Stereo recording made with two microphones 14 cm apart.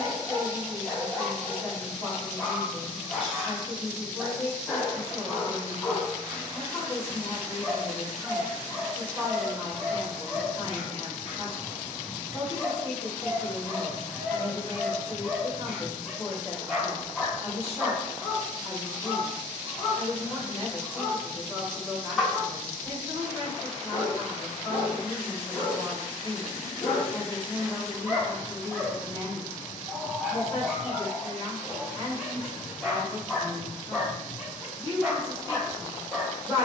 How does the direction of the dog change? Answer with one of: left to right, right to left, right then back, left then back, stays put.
stays put.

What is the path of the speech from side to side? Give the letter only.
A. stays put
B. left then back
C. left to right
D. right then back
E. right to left
A.